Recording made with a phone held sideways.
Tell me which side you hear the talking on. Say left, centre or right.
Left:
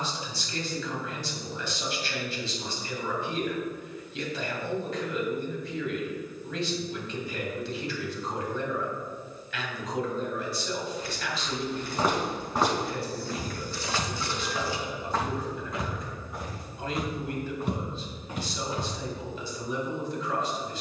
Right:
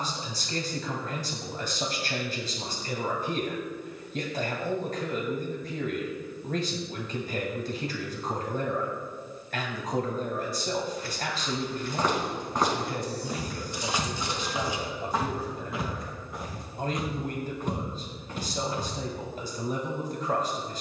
right.